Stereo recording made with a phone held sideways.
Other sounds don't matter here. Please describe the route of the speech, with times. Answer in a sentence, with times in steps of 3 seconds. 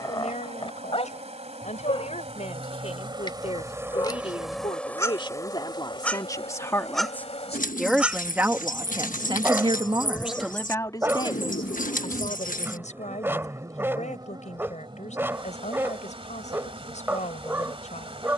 You can hear the speech on the left from 0 s, in the centre from 6 s and on the left from 12 s.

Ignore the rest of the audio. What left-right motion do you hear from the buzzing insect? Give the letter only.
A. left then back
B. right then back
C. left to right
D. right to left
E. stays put
A.